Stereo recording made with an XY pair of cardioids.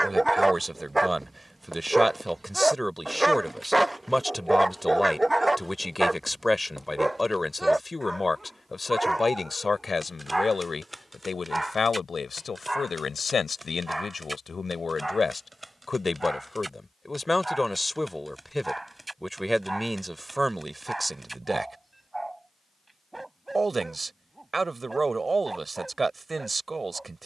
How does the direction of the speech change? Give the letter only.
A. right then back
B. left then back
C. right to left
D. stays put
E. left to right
B.